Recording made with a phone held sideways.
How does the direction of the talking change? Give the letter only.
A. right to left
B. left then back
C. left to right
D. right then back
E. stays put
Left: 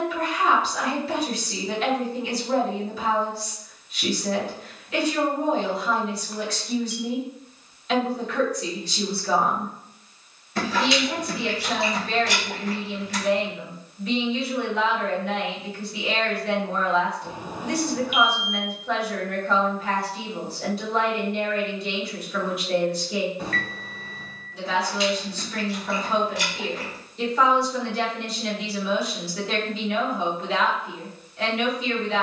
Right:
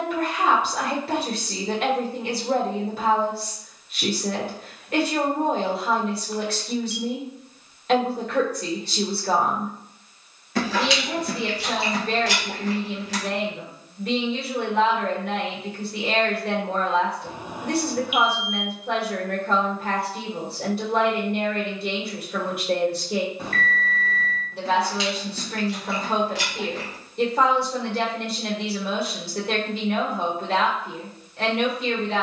E.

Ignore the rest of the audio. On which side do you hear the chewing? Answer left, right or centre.
right.